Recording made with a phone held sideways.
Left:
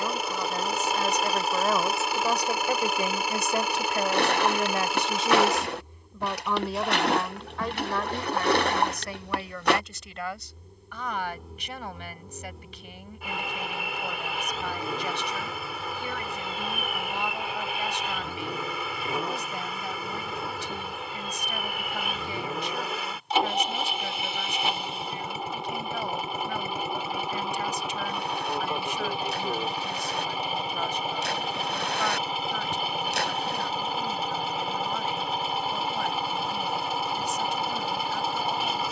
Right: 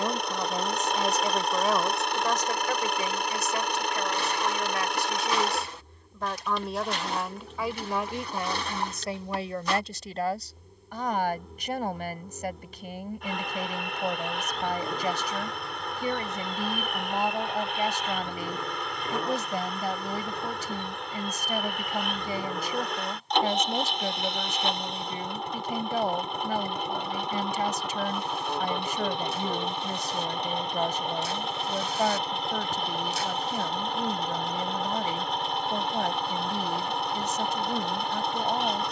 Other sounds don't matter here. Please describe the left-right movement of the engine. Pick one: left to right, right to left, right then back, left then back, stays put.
stays put.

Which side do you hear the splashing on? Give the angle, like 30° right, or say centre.
70° left.